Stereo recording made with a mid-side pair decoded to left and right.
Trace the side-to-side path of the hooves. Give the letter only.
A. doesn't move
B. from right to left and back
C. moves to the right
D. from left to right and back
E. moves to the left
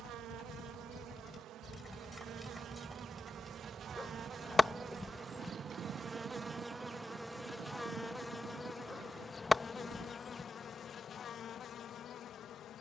C.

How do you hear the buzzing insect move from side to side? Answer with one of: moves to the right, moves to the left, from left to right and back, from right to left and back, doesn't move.
moves to the left.